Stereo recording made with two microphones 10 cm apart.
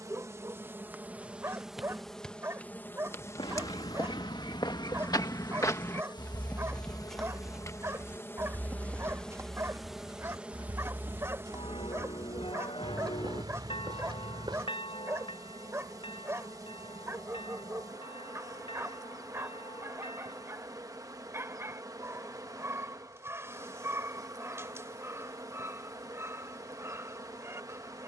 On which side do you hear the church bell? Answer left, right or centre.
left.